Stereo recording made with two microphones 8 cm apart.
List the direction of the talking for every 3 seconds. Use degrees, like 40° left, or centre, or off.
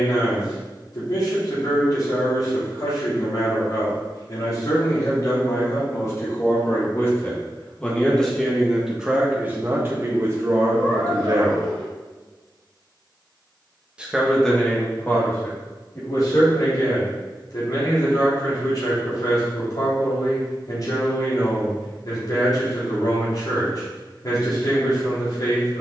50° left, 50° left, 20° left, 40° right, centre, 40° left, 50° left, 50° left, 50° left.